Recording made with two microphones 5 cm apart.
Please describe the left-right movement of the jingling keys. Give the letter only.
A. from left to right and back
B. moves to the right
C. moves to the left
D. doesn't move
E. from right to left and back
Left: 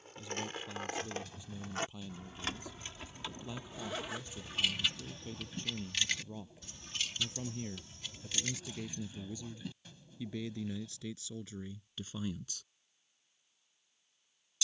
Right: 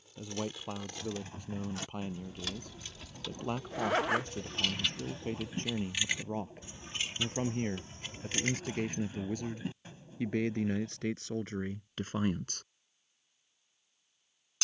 B.